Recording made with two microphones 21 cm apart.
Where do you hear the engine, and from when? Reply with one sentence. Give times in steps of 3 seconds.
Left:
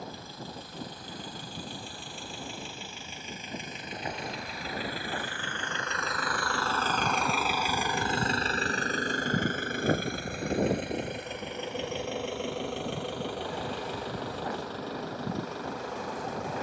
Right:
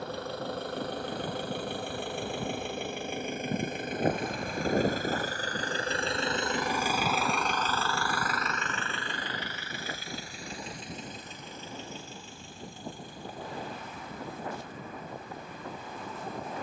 In this clip you hear the engine on the right from 0 s, in the centre from 6 s and on the left from 9 s.